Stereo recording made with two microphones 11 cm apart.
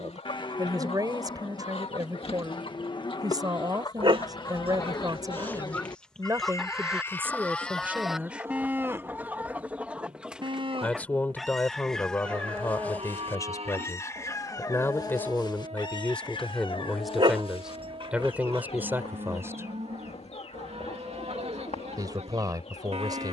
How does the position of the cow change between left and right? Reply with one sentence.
In this clip you hear the cow move to the right.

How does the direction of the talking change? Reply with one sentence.
In this clip you hear the talking move from right to left and back again.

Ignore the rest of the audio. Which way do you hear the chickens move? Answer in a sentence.
You can hear the chickens go right and come back.